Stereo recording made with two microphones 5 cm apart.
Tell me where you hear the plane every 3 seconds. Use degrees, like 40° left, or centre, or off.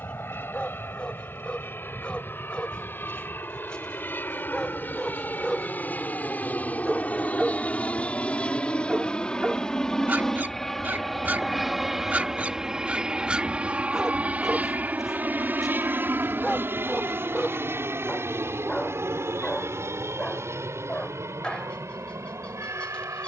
60° left, 50° left, 30° left, 10° left, 20° right, 50° right, 60° right, 70° right.